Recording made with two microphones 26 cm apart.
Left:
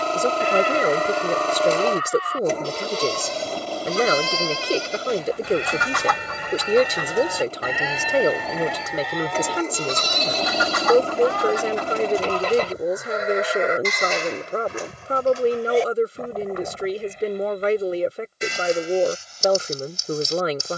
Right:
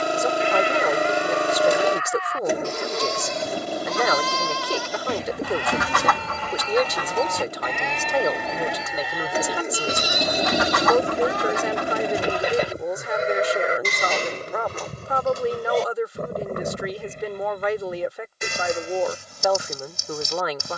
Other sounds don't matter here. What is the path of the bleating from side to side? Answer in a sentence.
You can hear the bleating move to the right.